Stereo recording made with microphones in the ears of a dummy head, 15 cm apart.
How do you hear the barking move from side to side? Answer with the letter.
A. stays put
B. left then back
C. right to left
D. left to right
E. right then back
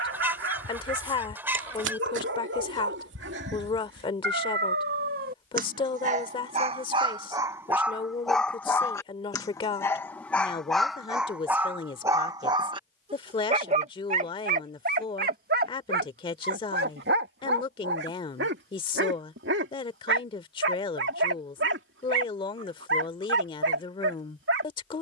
B.